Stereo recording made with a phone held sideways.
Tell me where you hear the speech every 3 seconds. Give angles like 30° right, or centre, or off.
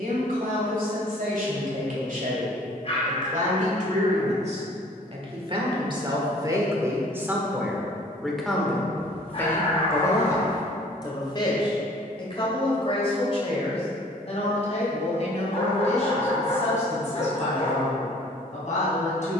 70° right, 50° right, 10° right, 20° left, 40° left, 50° left, 60° left.